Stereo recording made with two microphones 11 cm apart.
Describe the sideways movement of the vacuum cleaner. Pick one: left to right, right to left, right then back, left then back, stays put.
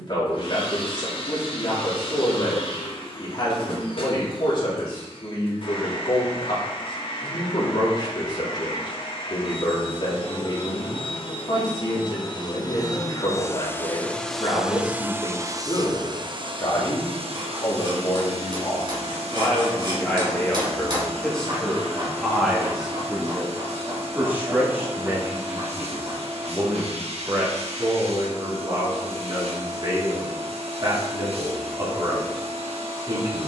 left to right.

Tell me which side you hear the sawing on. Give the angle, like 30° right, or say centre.
50° right.